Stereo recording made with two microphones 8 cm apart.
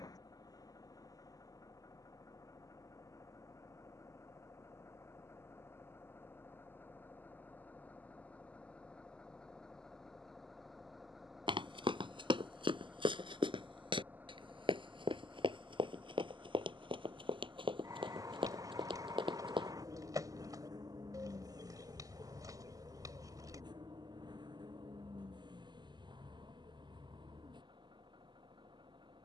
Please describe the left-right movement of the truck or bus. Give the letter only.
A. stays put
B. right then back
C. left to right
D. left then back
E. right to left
C.